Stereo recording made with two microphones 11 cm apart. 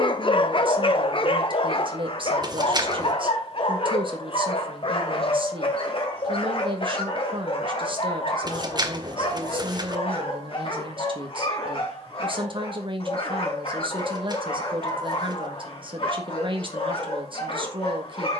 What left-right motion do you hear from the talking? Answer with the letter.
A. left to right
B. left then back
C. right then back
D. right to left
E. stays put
E.